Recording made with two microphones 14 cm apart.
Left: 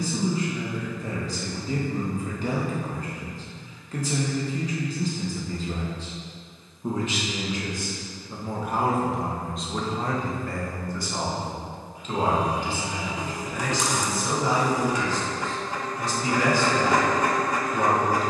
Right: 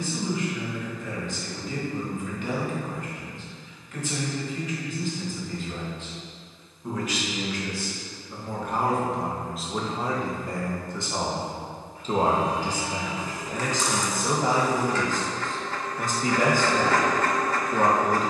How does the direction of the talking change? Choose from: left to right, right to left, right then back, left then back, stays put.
left to right.